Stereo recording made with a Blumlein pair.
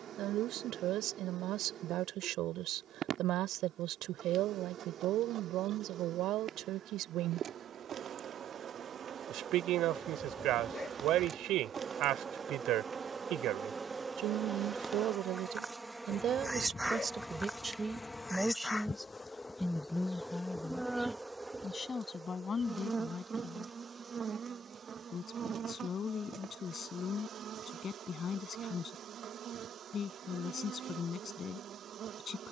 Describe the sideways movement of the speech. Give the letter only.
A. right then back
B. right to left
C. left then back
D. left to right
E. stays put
B.